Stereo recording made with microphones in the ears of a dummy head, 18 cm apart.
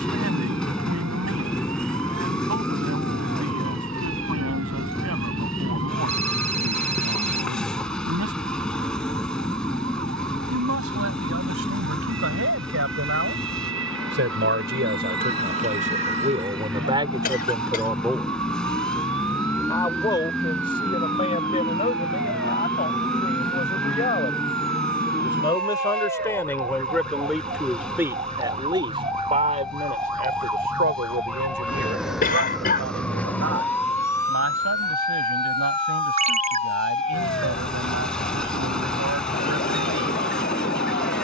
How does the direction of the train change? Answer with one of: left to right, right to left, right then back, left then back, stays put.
stays put.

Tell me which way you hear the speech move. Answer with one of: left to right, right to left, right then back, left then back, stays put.
left then back.